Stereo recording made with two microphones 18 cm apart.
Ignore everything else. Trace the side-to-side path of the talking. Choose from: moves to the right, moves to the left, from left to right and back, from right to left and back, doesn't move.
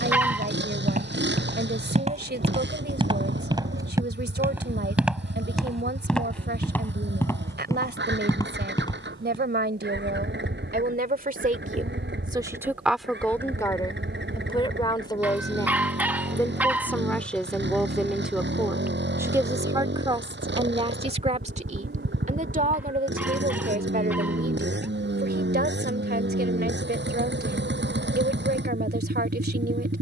from right to left and back.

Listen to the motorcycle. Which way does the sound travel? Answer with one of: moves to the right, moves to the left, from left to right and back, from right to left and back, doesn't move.
doesn't move.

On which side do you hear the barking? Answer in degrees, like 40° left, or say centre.
10° right.